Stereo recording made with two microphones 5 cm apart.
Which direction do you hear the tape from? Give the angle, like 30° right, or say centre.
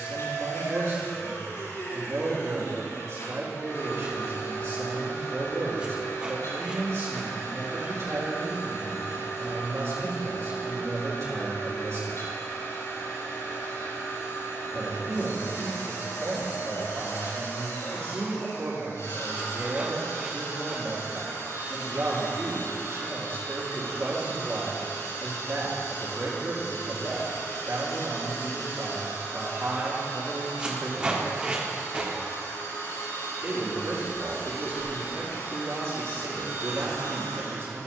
20° right.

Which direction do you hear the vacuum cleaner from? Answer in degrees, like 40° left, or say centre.
80° left.